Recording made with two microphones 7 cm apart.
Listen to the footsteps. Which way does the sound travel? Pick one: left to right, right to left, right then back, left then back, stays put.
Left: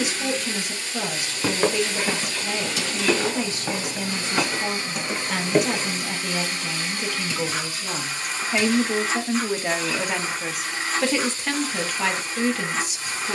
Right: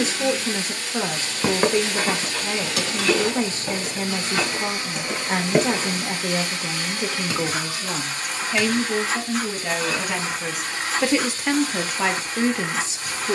left then back.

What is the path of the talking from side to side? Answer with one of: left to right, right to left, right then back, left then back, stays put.
left then back.